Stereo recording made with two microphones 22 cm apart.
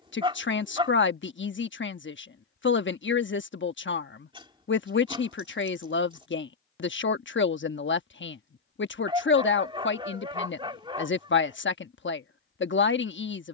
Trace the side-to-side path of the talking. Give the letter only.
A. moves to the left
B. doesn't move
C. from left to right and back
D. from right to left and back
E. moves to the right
B.